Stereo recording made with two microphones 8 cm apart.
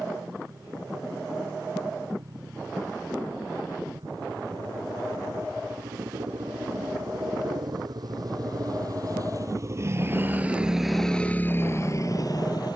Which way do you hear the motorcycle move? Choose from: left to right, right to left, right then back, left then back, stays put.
right to left.